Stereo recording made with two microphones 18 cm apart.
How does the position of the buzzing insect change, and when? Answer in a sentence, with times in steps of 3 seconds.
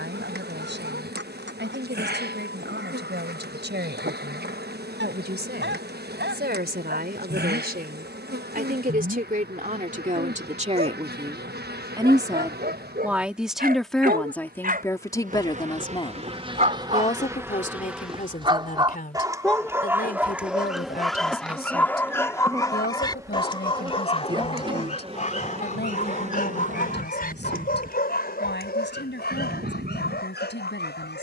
In this clip you hear the buzzing insect on the right from 0 s, in the centre from 18 s and on the right from 24 s.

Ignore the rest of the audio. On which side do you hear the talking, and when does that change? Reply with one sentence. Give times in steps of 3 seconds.
In this clip you hear the talking on the right from 0 s, in the centre from 12 s and on the left from 15 s.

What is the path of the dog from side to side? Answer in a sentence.
In this clip you hear the dog go from the right side to the left.